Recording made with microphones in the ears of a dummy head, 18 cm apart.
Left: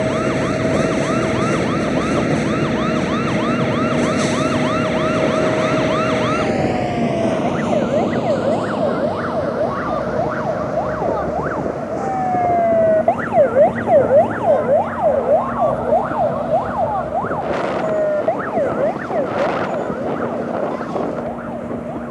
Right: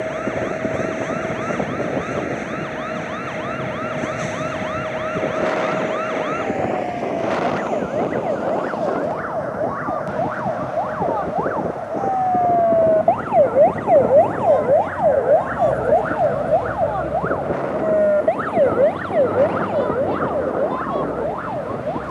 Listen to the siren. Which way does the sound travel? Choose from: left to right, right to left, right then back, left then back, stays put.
left to right.